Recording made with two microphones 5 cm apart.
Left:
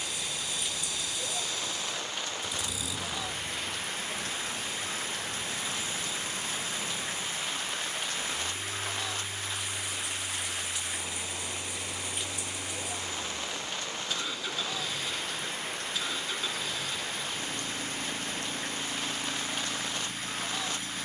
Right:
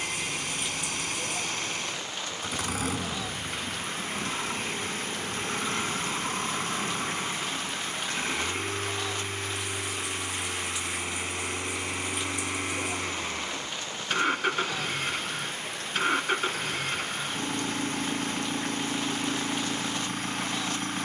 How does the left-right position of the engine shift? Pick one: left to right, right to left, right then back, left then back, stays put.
stays put.